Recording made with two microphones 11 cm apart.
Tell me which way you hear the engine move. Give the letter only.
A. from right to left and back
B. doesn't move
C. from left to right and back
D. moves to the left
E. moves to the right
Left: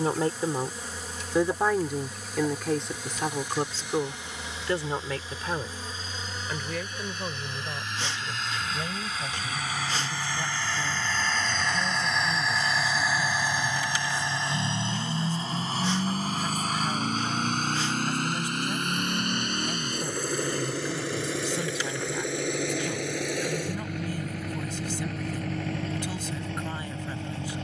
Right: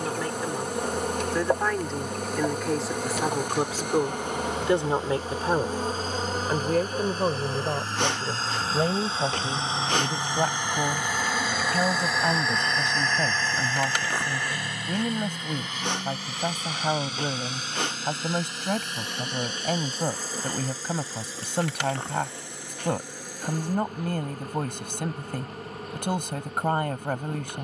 D.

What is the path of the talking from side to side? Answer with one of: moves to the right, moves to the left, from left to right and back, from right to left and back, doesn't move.
moves to the right.